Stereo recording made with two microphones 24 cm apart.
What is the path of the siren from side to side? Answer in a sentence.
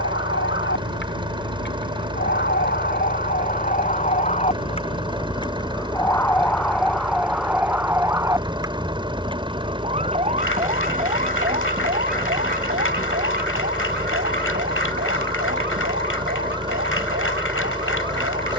In this clip you hear the siren move from left to right.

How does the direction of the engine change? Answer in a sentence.
In this clip you hear the engine stay in one place.